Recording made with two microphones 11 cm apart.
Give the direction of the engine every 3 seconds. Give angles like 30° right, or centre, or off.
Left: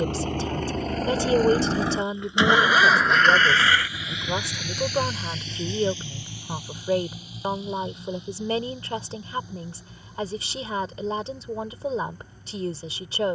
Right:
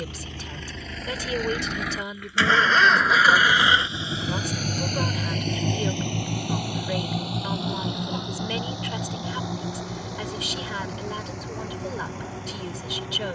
30° left, 30° right, 70° right, 80° right, 80° right.